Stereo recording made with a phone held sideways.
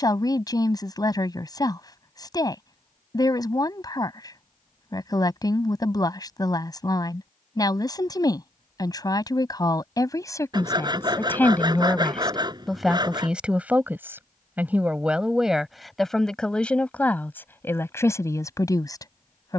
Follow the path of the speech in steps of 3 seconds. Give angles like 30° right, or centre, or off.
20° left, 20° left, 20° left, 20° left, 10° right, 10° left, 20° left.